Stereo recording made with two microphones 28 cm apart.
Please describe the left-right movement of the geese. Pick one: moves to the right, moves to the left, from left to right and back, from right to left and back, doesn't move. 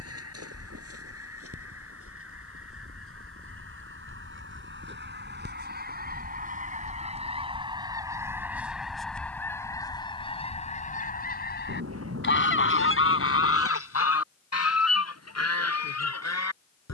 moves to the left.